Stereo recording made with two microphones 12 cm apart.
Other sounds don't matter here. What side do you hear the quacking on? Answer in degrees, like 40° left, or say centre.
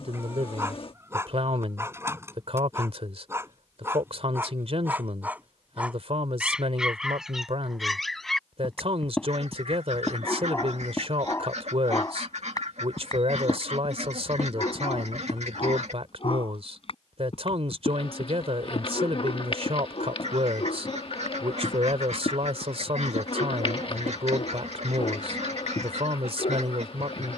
70° right.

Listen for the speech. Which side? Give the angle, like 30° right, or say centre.
60° right.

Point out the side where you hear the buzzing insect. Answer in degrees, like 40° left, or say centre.
50° left.